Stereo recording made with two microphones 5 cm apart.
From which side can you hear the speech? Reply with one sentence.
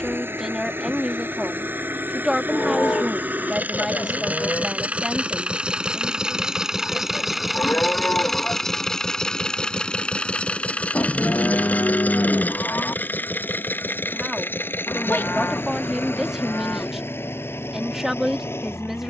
You can hear the speech in the centre.